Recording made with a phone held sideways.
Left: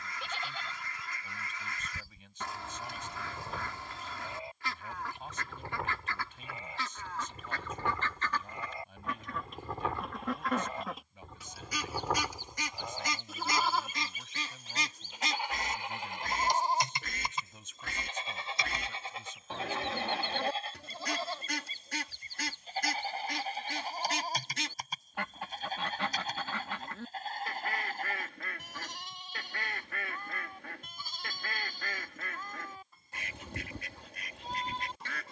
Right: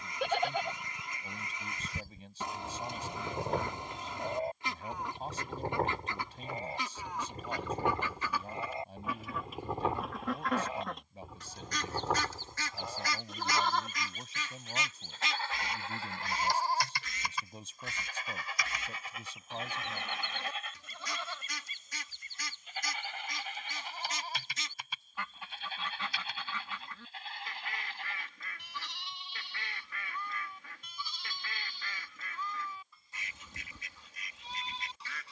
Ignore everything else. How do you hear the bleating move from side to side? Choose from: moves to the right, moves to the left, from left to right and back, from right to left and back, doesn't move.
moves to the left.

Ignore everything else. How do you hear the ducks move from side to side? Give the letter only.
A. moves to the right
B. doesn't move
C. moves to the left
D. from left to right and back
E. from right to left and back
C.